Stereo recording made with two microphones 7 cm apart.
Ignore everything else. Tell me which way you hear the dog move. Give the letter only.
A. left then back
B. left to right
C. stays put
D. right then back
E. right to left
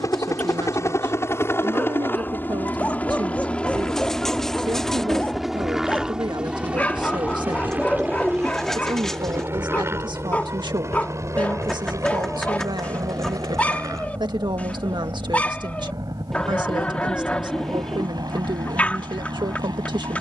C.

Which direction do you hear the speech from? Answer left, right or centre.
right.